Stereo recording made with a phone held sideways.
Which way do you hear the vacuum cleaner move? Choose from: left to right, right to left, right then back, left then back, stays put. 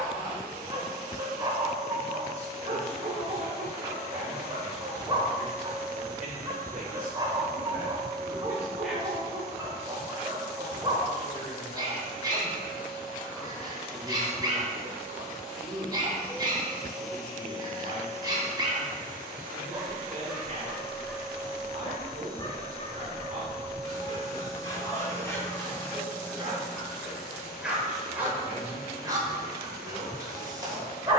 right to left.